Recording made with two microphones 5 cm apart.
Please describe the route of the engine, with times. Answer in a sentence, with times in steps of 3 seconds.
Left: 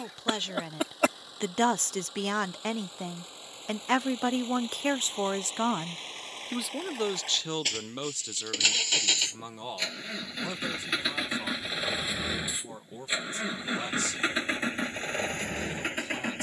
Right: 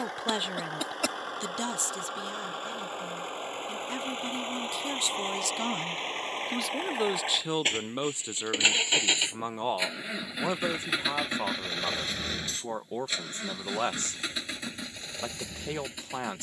In this clip you hear the engine on the right from 0 s, in the centre from 9 s and on the left from 12 s.